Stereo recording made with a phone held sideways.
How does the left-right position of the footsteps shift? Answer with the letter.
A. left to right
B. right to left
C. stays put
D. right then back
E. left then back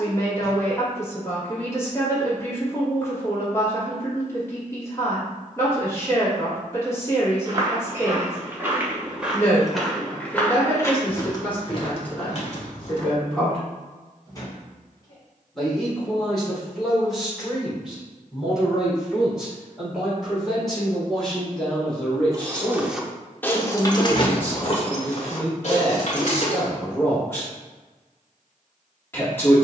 B.